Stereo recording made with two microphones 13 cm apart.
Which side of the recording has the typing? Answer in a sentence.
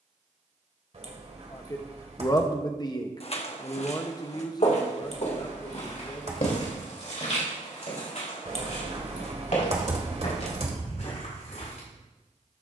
In this clip you hear the typing on the right.